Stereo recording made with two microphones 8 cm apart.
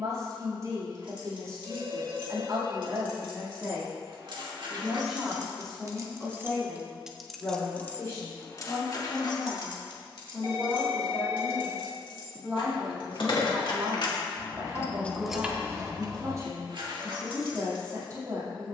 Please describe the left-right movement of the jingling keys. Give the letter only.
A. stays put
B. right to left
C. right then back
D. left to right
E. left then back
E.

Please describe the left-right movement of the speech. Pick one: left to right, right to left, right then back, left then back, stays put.
left then back.